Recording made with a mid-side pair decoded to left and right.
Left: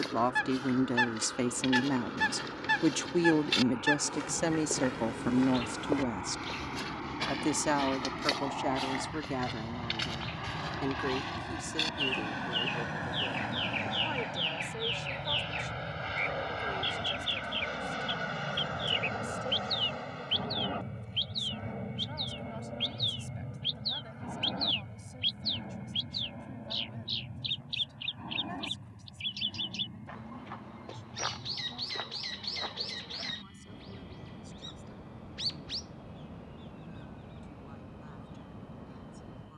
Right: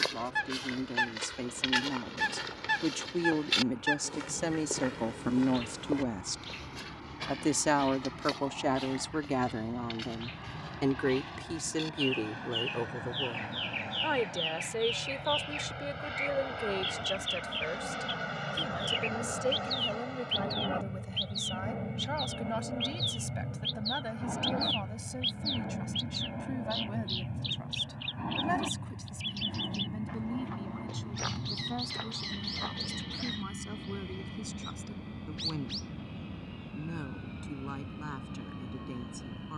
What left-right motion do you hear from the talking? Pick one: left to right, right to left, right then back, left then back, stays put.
left to right.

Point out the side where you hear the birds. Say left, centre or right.
centre.